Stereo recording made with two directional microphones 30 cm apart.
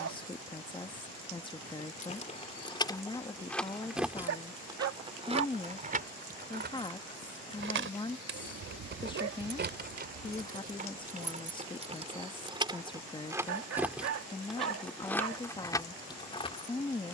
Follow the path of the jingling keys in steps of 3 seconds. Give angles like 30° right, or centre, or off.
20° left, 10° right, 40° right, 30° right, 10° right, 10° left.